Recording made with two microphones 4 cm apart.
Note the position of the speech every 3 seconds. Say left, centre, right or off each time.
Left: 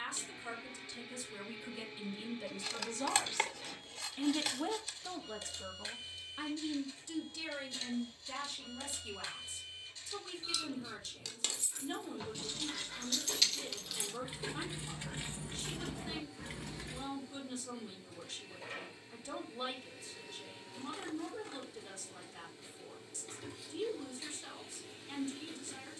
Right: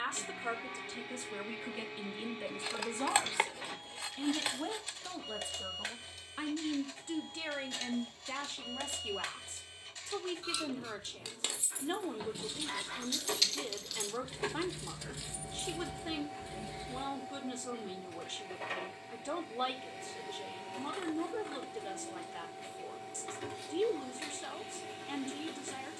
right, centre, right, right, right, right, right, right, right.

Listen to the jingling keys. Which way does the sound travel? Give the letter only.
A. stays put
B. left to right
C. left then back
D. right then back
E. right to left
E.